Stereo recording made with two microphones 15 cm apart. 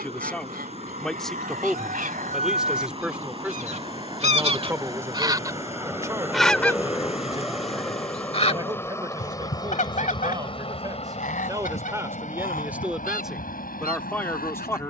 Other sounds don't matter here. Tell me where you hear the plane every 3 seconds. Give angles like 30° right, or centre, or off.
40° right, 30° right, centre, 30° left, 60° left.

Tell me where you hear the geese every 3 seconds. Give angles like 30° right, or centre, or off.
70° right, 40° right, 30° left, 60° left, 70° left.